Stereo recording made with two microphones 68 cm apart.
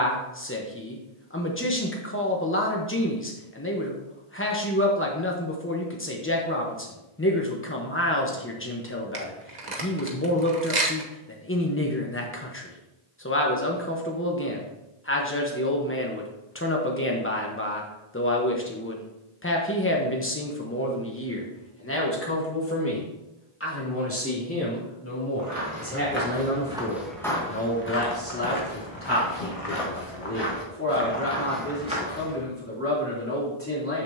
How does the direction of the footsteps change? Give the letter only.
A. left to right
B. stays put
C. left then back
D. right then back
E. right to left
C.